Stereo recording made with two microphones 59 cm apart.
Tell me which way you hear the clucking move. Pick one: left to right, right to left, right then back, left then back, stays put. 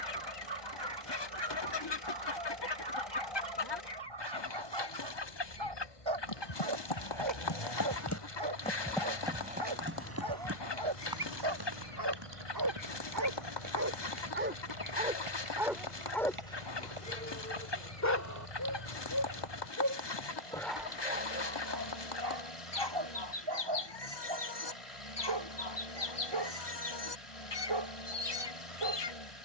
stays put.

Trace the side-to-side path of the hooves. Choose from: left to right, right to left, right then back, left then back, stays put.
left to right.